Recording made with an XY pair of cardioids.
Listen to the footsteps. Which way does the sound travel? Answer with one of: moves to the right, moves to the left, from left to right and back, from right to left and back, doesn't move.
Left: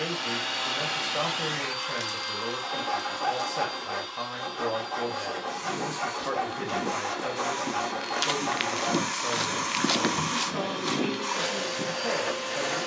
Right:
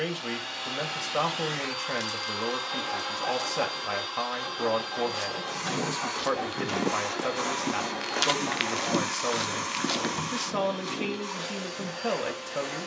moves to the left.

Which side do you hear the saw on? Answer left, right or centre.
left.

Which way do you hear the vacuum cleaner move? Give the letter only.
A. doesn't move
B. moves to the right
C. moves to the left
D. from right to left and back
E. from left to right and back
E.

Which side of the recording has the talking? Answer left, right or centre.
right.